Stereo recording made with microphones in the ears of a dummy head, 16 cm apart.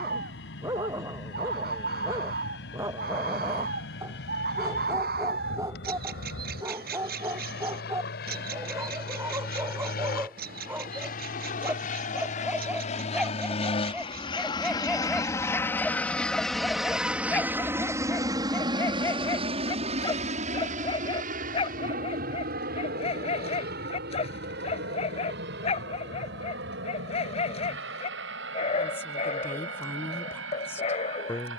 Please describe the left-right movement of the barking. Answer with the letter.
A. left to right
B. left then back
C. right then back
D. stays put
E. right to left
E.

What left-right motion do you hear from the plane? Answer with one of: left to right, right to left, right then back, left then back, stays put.
left to right.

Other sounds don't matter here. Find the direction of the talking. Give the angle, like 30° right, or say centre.
10° left.